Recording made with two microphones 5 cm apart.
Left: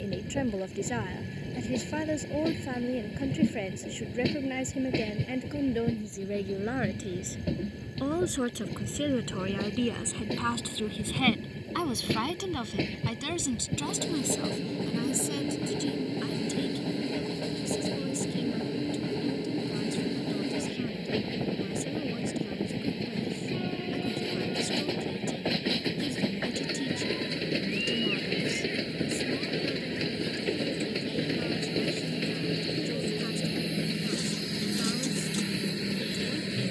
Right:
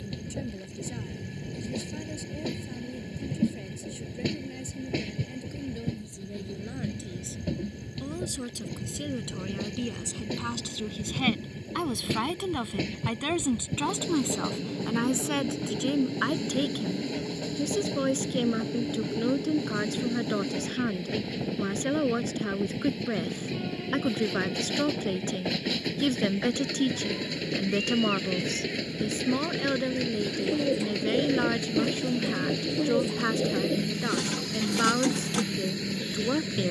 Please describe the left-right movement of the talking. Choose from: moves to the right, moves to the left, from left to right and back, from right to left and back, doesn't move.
moves to the right.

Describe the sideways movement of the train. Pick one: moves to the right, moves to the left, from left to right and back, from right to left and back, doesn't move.
doesn't move.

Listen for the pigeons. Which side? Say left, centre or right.
right.